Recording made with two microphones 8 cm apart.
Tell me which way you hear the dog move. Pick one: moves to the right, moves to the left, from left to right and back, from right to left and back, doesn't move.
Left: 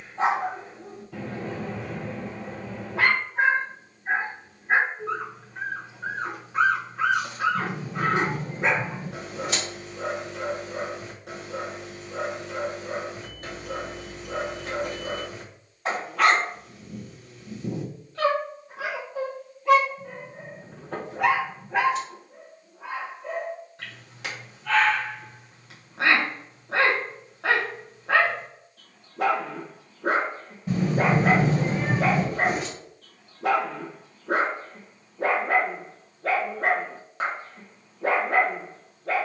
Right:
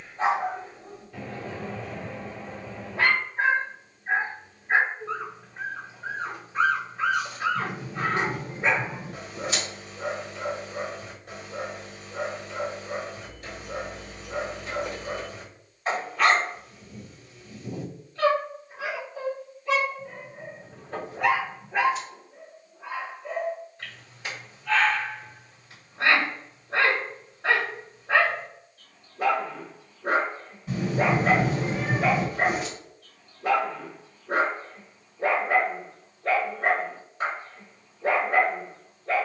doesn't move.